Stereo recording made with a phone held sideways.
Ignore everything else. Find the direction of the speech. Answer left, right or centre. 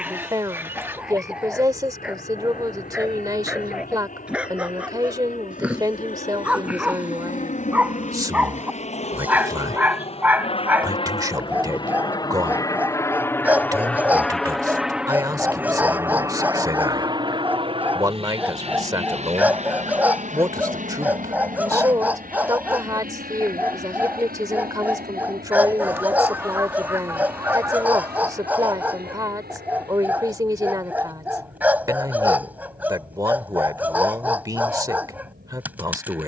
right.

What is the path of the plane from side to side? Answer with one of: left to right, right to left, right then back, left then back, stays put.
left to right.